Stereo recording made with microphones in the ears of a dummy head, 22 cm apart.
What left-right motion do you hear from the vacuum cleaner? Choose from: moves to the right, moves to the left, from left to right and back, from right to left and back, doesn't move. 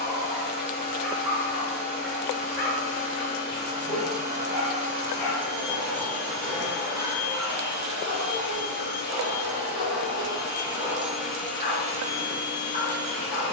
from left to right and back.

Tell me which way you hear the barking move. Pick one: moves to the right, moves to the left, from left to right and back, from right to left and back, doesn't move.
moves to the left.